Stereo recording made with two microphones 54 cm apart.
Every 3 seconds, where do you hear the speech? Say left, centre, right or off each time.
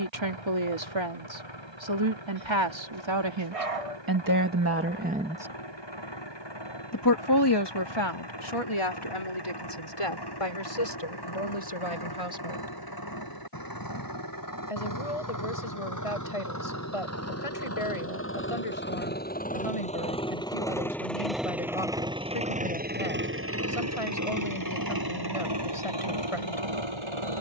right, right, left, left, left, left, left, left, left.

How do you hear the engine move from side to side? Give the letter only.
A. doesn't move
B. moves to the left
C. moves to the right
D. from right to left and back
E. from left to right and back
C.